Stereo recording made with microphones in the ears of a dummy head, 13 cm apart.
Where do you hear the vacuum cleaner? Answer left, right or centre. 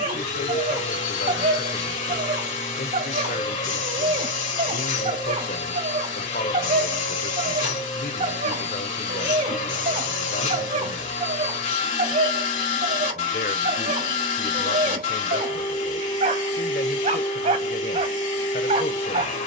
left.